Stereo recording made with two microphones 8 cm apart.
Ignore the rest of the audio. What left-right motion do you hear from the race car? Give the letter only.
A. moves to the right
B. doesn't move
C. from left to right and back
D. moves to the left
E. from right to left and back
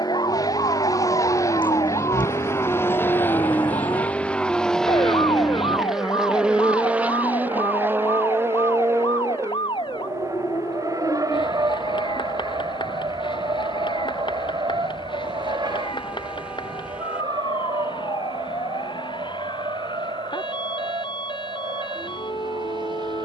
A.